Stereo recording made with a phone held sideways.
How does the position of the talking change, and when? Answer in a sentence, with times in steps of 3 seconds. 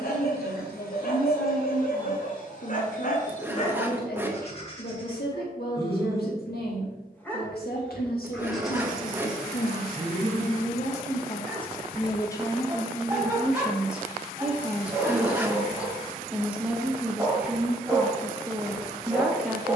In this clip you hear the talking on the left from 0 s and in the centre from 12 s.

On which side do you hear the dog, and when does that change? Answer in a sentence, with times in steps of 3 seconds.
You can hear the dog on the left from 0 s and in the centre from 6 s.